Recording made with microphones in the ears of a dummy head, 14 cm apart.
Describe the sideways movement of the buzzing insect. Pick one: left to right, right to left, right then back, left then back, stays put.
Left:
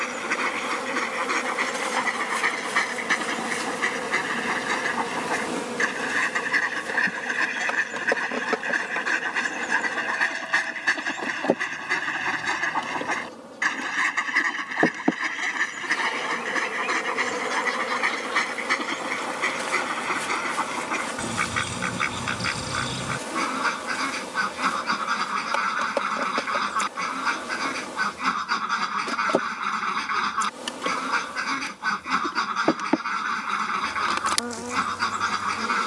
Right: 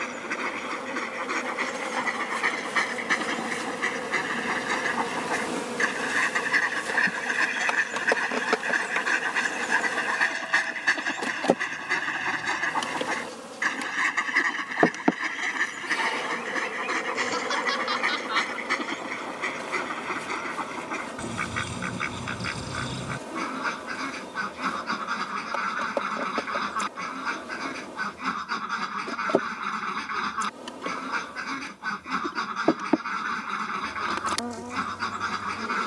right then back.